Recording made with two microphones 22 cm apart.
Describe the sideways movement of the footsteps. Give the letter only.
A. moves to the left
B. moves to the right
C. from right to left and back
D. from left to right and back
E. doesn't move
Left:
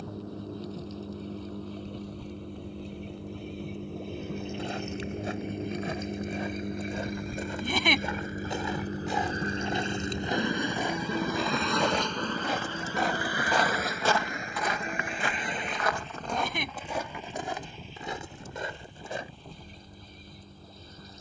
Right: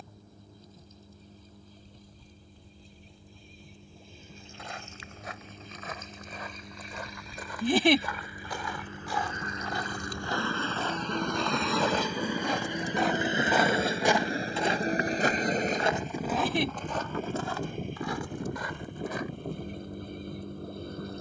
D.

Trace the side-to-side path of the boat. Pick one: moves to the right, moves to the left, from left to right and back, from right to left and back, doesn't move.
moves to the right.